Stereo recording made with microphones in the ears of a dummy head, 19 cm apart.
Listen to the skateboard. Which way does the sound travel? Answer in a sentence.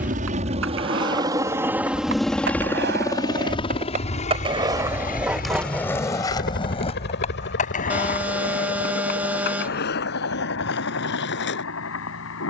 You can hear the skateboard travel towards the left.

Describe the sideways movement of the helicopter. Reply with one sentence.
In this clip you hear the helicopter go from the right side to the left.